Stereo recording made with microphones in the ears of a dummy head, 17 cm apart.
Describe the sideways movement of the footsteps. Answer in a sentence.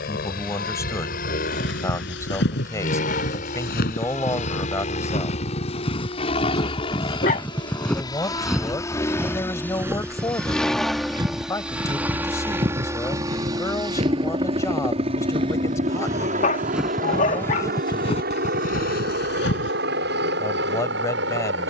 You can hear the footsteps go right and come back.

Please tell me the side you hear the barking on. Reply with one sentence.
You can hear the barking on the left.